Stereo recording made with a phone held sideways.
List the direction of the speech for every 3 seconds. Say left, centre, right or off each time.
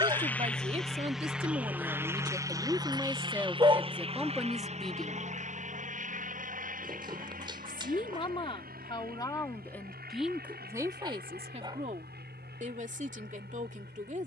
right, centre, left, centre, right.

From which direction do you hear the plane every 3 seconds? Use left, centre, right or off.
centre, right, right, right, right.